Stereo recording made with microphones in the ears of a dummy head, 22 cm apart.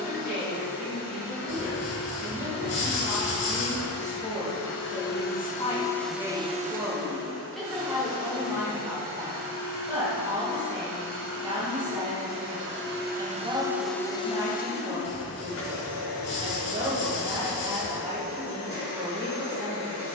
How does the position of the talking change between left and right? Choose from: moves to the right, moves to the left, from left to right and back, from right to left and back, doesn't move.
moves to the right.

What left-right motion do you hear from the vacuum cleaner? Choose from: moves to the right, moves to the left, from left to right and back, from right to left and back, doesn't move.
from left to right and back.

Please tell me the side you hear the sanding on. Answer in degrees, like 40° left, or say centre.
60° left.